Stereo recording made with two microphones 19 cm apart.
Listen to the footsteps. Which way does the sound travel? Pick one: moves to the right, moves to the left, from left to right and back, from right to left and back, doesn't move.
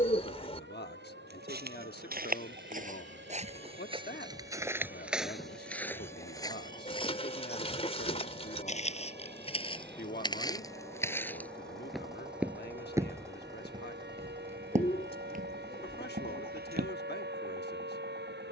from right to left and back.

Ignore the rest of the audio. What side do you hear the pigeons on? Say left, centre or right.
left.